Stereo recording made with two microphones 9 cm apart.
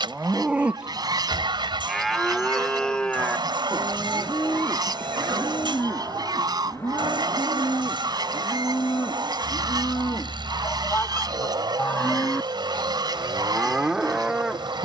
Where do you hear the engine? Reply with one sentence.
In this clip you hear the engine on the right.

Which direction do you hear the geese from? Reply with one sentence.
You can hear the geese on the right.